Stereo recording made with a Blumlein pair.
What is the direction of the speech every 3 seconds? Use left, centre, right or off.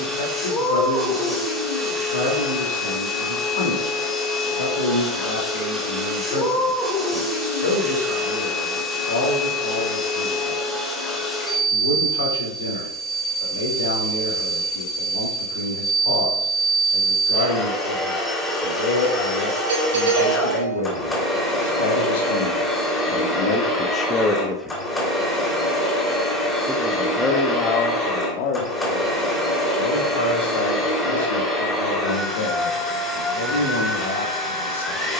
left, left, left, left, left, left, left, left, centre, left, left, left.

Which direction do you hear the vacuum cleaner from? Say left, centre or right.
centre.